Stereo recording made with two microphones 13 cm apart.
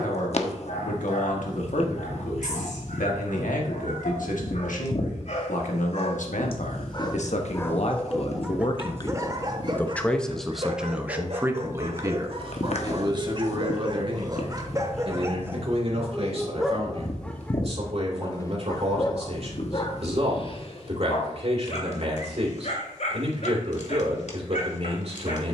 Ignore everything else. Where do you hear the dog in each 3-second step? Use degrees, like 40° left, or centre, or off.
70° left, 70° left, 10° left, 40° right, 40° right, centre, 40° left, 60° left, 60° left.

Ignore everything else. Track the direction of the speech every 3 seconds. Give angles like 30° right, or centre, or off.
80° left, 80° left, 60° left, centre, 40° right, 50° right, 50° right, 50° right, 50° right.